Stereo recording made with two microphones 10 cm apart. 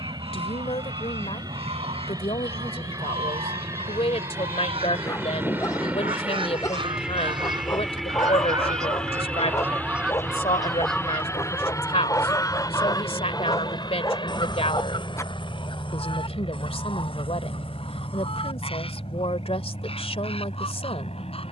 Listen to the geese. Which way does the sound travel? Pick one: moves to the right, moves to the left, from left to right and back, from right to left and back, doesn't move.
moves to the left.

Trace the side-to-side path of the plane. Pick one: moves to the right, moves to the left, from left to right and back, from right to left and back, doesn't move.
moves to the left.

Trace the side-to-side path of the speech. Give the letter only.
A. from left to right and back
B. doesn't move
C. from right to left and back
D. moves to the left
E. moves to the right
B.